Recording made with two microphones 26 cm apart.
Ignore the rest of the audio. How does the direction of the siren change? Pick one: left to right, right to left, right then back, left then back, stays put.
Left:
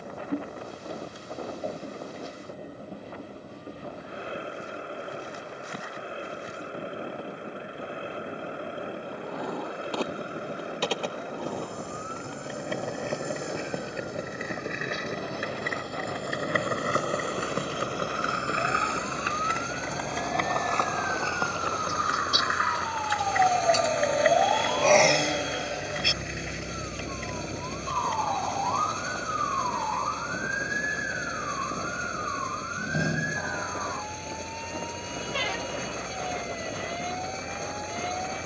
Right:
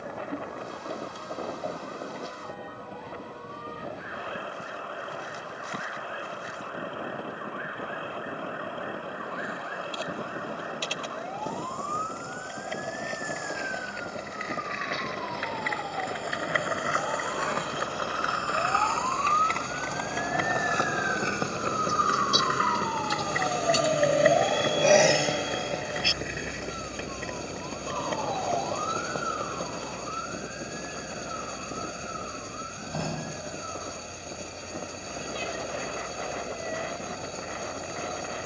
right to left.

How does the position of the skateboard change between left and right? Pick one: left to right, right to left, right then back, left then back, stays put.
left to right.